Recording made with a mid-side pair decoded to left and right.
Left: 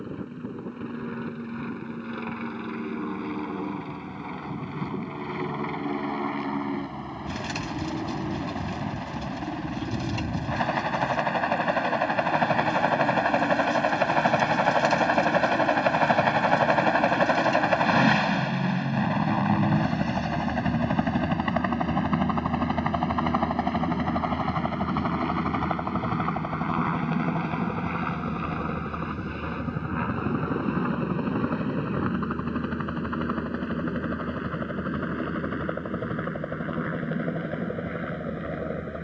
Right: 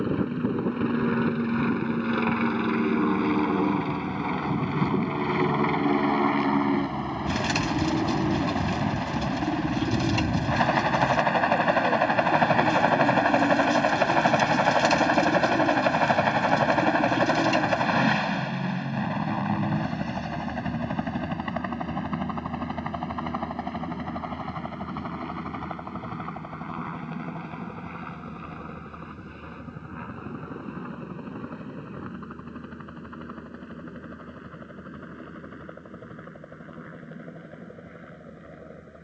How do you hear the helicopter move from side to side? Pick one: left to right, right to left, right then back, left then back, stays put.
right to left.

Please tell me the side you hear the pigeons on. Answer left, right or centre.
right.